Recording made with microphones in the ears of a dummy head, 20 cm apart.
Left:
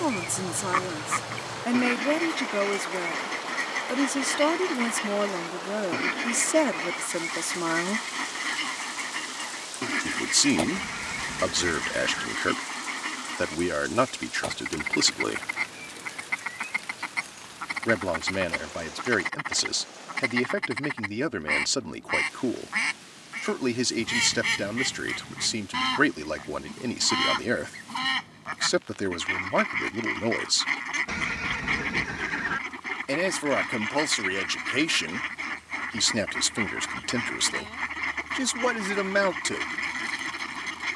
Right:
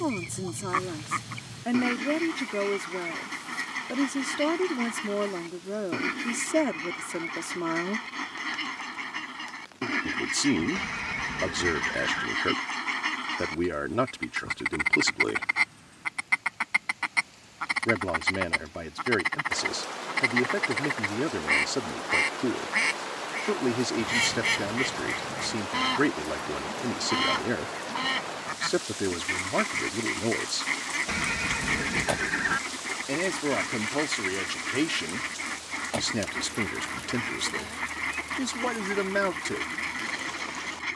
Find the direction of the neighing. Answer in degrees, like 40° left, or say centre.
10° right.